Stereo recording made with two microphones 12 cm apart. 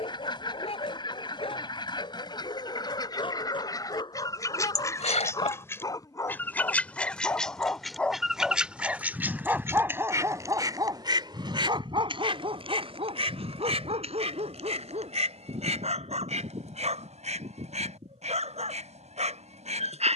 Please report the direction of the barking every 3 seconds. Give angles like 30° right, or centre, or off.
50° left, 40° left, 10° left, 30° right, 60° right, 70° right, 70° right.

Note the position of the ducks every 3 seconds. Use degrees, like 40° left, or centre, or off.
40° left, 30° left, centre, 30° right, 60° right, 80° right, 80° right.